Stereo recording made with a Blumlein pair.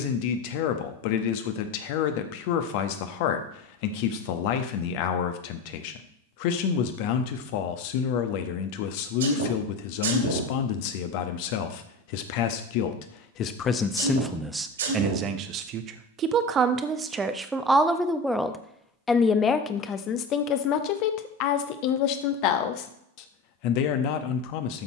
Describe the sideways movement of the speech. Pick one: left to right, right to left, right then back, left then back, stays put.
right then back.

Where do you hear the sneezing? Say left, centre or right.
right.